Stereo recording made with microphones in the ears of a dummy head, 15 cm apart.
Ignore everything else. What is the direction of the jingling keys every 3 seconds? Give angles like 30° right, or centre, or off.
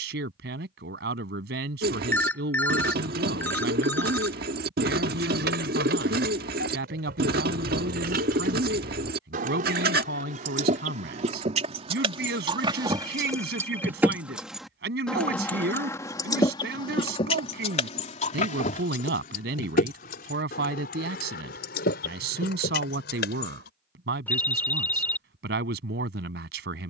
off, 70° right, 60° right, 50° right, 20° right, 20° left, 50° left, 60° left, off.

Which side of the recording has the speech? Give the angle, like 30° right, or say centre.
70° right.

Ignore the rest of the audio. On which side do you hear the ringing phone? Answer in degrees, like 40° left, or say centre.
10° left.